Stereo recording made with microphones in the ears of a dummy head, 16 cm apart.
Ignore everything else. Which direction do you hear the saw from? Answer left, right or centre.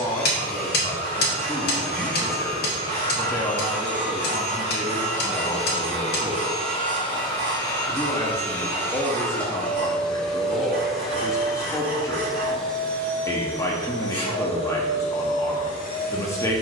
right.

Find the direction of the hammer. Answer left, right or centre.
left.